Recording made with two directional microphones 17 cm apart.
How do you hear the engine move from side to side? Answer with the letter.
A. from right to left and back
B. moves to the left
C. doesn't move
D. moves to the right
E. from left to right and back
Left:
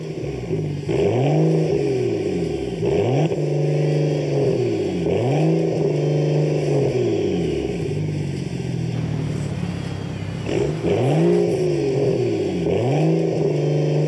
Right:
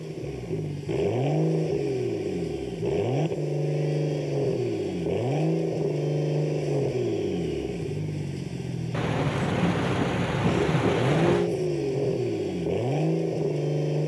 C.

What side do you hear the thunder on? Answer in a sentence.
You can hear the thunder on the right.